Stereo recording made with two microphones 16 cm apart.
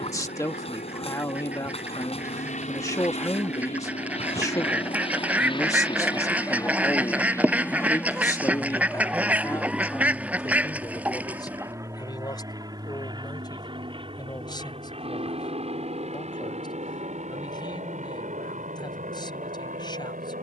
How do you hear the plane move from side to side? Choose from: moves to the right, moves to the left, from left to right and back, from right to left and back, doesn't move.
moves to the right.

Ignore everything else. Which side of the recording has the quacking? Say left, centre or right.
centre.